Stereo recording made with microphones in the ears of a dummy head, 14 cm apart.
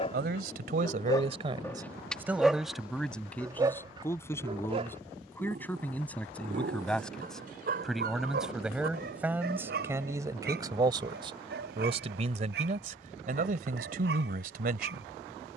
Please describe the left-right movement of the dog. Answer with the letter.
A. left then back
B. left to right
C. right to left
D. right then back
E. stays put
B.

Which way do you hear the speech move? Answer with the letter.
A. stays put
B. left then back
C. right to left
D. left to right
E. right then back
B.